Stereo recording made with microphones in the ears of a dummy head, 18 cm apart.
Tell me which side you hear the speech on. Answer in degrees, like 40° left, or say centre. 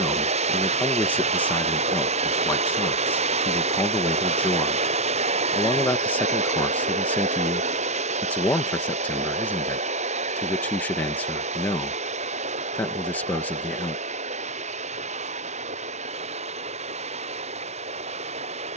10° left.